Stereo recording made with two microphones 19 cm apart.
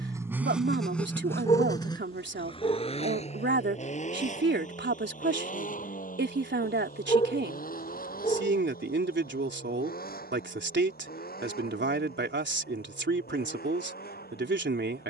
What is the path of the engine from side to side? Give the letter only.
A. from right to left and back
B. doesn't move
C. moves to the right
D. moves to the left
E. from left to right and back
D.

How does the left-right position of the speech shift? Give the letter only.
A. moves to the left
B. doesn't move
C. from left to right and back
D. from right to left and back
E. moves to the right
B.